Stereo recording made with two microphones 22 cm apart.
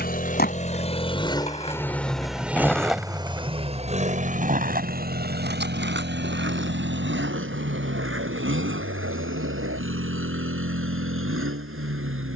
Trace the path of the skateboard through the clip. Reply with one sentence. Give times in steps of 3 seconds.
You can hear the skateboard on the left from 0 s and on the right from 3 s.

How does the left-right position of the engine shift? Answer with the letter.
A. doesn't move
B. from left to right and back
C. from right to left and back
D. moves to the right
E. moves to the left
D.